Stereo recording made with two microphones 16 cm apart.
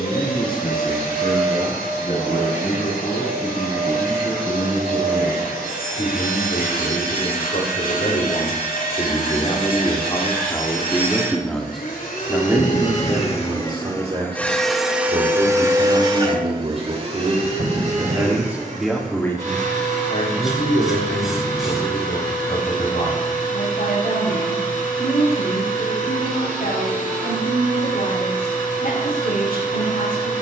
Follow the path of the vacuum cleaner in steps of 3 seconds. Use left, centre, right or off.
left, left, left, left, left, right, right, right, right, right.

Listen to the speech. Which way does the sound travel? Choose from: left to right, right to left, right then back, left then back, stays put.
right then back.